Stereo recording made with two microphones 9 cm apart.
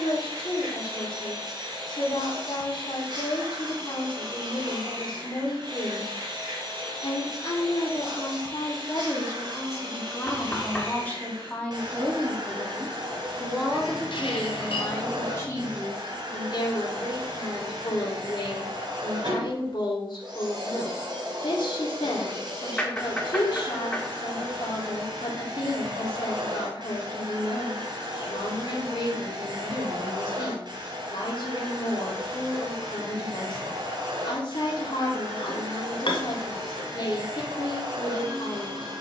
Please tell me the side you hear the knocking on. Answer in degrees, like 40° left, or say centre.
10° left.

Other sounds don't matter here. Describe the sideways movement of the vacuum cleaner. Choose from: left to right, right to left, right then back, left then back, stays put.
stays put.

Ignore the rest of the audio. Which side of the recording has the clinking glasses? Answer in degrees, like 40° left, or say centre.
70° left.